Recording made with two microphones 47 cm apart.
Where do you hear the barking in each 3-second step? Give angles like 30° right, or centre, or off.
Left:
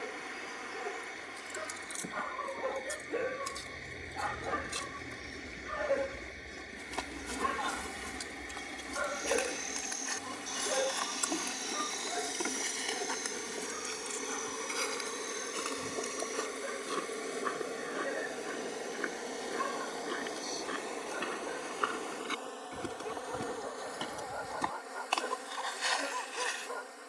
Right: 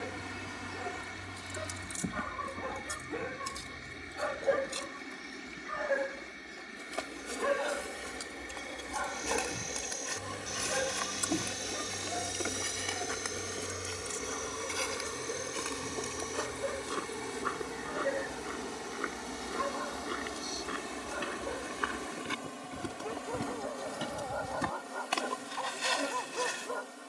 50° right, 20° left, 20° left, 30° right, 60° right, 60° right, 60° right, 60° right, 60° right.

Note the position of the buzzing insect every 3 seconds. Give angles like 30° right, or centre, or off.
50° right, 10° right, 20° left, 20° left, 10° left, 10° right, 20° right, 40° right, 50° right.